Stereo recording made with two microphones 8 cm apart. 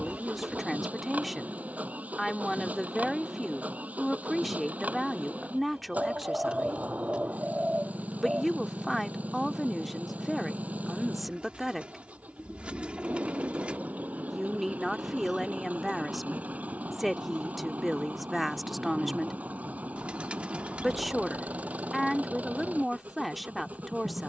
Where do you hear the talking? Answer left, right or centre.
centre.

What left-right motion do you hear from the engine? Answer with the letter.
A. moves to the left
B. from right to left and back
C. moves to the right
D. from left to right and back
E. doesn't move
E.